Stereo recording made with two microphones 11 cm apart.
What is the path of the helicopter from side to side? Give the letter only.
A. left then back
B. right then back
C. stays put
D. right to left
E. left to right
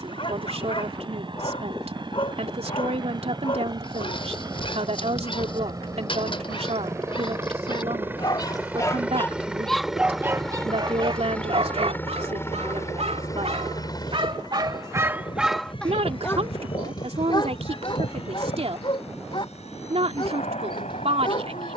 D.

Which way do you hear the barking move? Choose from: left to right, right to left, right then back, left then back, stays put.
right then back.